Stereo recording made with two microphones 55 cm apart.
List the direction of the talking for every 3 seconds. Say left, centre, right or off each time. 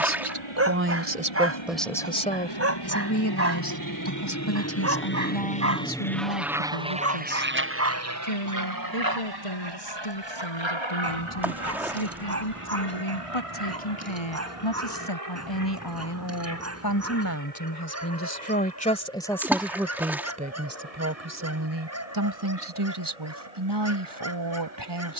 centre, left, left, left, left, left, centre, right, right.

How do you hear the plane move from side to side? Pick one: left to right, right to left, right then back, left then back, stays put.
left to right.